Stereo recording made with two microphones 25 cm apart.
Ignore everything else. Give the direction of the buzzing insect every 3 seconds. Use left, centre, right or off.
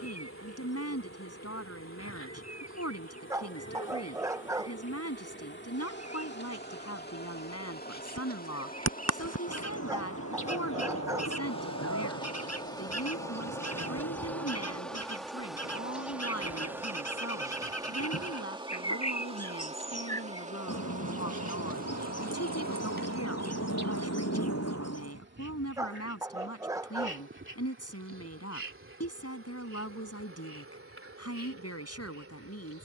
left, left, left, left, centre, centre, right, right, right, right, right.